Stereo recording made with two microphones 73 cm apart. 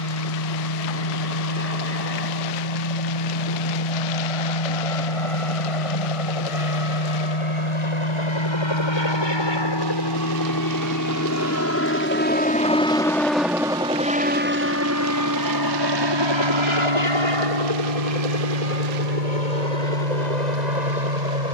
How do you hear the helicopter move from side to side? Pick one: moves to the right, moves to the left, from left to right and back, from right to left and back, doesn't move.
moves to the right.